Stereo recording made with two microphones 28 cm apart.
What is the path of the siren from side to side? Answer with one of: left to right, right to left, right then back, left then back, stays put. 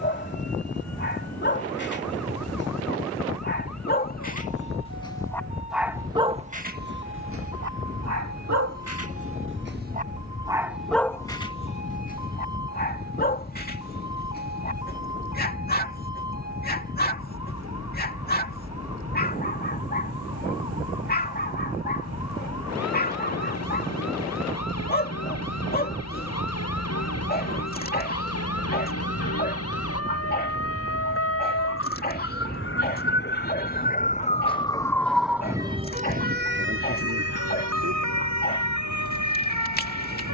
left to right.